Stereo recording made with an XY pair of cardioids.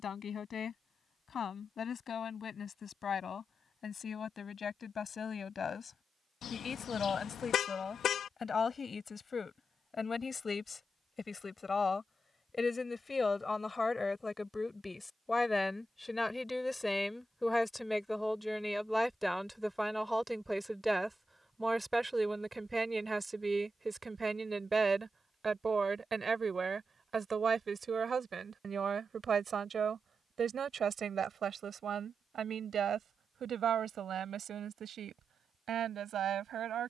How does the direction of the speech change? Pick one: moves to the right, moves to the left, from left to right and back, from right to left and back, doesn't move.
moves to the right.